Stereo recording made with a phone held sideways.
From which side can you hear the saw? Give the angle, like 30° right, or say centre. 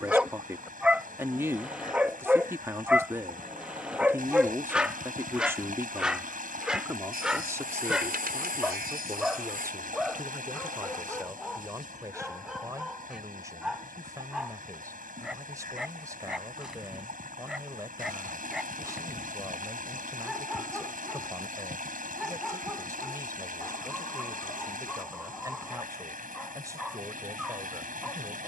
80° right.